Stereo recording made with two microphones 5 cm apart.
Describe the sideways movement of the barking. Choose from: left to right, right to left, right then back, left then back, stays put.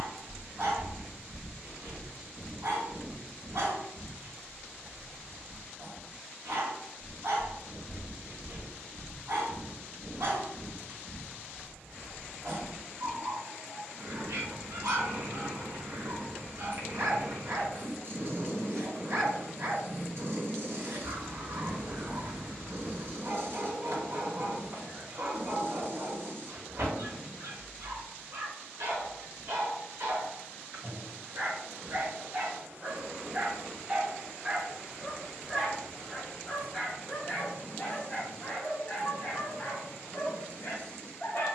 right to left.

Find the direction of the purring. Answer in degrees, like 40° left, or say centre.
60° right.